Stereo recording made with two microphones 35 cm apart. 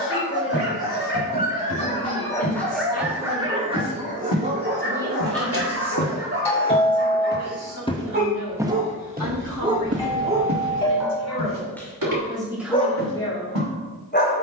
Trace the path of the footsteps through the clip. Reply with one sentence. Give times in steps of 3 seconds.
In this clip you hear the footsteps on the left from 0 s and on the right from 9 s.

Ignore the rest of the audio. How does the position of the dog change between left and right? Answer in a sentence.
You can hear the dog move from left to right and back again.